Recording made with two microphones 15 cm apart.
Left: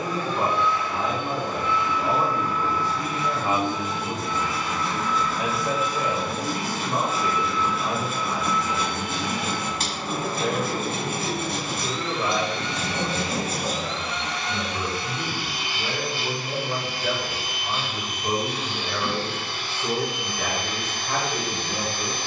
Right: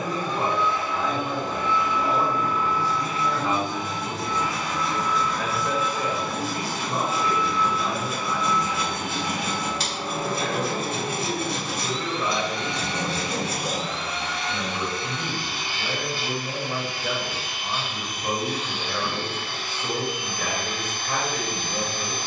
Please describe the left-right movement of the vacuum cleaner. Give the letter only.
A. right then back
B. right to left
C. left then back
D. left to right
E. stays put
B.